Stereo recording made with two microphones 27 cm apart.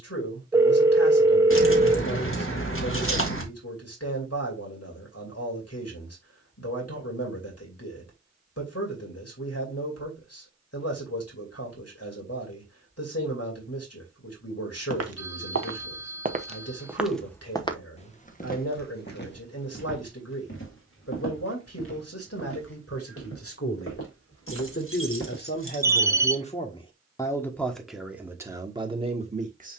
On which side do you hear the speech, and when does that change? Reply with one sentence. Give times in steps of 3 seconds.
You can hear the speech on the left from 0 s and in the centre from 27 s.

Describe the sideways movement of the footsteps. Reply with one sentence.
In this clip you hear the footsteps travel towards the left.